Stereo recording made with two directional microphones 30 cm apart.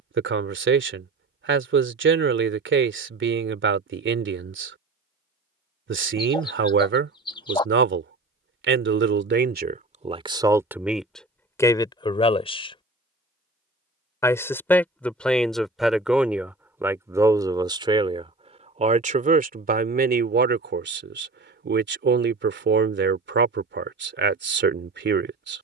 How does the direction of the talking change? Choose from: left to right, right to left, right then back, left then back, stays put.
left then back.